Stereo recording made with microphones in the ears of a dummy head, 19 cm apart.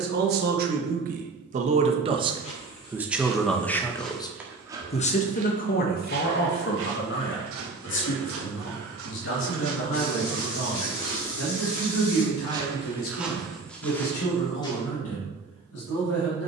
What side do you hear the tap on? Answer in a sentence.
In this clip you hear the tap on the left.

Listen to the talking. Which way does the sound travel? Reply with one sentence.
You can hear the talking go from the right side to the left.